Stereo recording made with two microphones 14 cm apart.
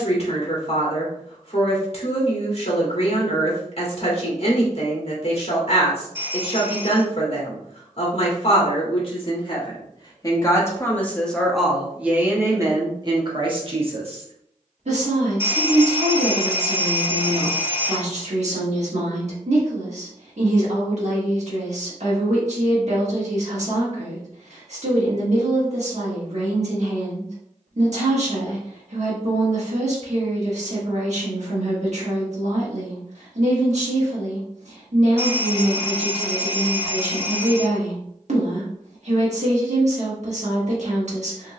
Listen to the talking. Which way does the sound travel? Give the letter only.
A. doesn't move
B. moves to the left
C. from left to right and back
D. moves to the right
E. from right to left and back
D.